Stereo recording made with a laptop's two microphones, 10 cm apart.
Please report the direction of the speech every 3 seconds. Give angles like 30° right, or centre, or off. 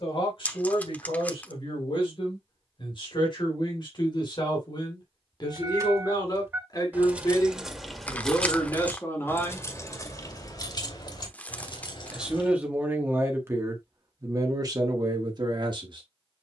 50° left, 50° left, 30° left, 20° left, 20° right, 40° right.